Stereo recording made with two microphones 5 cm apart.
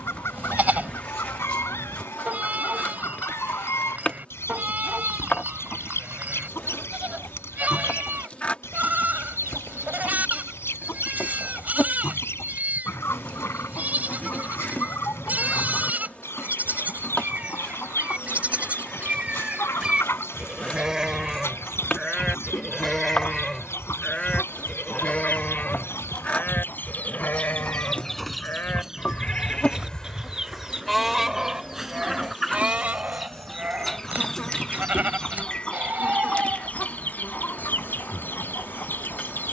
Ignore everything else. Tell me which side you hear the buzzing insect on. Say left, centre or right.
left.